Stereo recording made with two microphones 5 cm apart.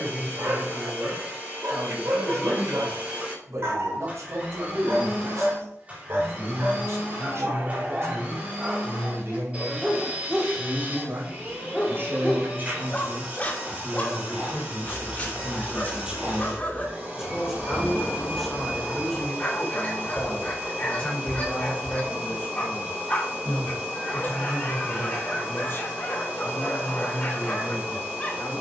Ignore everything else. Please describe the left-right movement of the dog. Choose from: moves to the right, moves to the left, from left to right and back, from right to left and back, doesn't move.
moves to the left.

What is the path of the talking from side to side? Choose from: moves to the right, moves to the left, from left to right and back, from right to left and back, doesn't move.
moves to the left.